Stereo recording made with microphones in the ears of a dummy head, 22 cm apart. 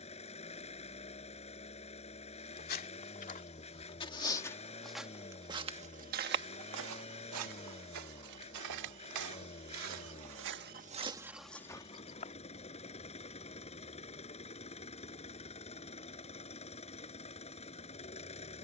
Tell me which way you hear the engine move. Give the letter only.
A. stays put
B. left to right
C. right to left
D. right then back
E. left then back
A.